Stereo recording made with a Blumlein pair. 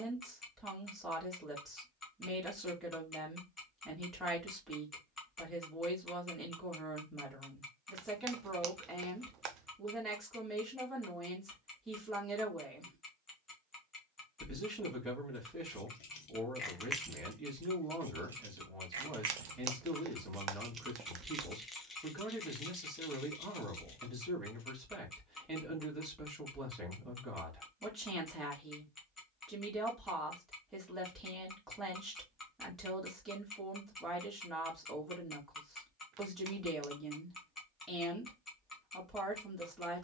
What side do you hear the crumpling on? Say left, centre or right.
right.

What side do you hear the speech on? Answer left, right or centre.
centre.